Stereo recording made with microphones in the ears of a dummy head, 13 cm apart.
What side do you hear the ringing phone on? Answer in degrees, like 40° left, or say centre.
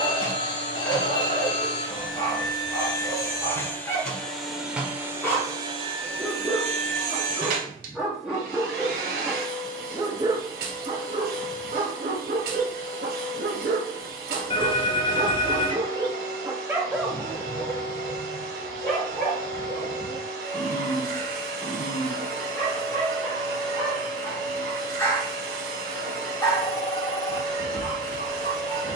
30° left.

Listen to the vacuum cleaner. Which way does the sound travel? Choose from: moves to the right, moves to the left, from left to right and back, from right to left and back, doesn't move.
moves to the right.